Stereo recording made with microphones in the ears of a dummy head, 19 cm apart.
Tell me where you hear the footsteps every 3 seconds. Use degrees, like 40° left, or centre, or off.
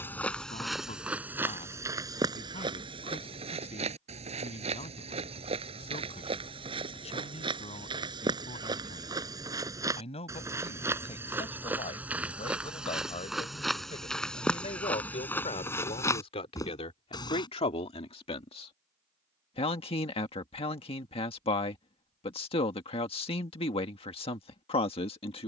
10° right, 30° right, 20° right, 10° right, centre, 10° left, off, off, off.